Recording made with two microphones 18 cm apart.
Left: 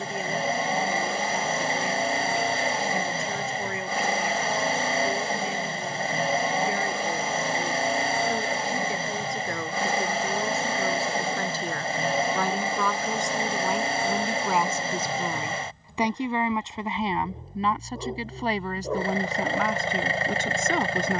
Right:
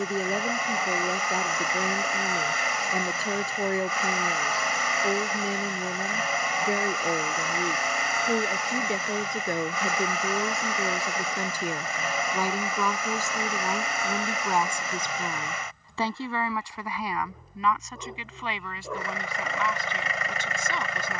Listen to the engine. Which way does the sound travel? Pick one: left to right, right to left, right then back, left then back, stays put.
stays put.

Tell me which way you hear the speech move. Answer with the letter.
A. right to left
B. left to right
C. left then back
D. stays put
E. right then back
A.